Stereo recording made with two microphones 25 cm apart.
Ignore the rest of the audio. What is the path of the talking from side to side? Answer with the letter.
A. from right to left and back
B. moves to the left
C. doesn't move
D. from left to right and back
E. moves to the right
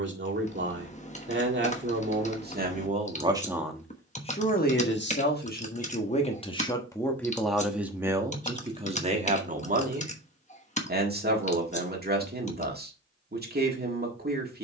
A.